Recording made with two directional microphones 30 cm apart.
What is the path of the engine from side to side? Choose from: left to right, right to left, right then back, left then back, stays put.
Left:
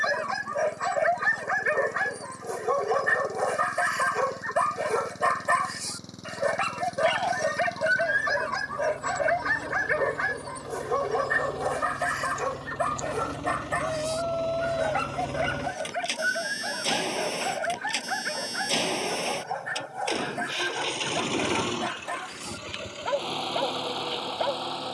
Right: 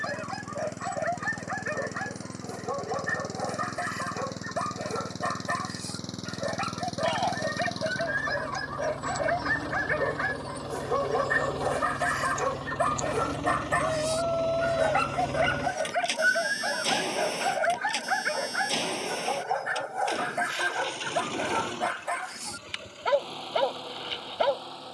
right to left.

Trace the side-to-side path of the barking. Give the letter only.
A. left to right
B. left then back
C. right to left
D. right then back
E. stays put
A.